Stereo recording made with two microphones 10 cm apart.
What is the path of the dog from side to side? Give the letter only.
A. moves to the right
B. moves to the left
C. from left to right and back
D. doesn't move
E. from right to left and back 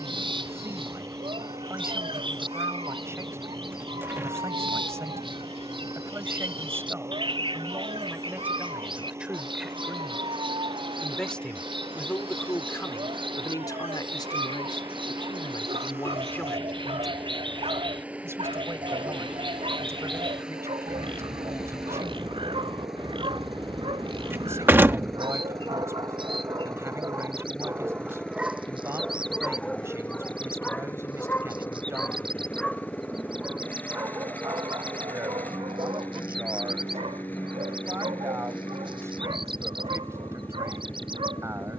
E.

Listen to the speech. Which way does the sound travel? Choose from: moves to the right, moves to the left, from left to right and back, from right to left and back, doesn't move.
from right to left and back.